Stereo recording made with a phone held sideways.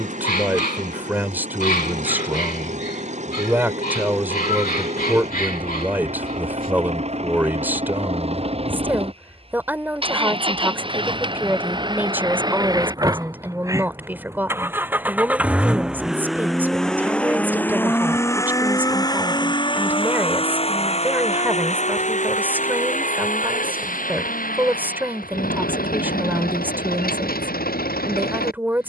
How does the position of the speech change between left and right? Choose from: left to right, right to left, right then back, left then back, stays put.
stays put.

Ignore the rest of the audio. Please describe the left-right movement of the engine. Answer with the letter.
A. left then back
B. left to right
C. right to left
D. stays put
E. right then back
C.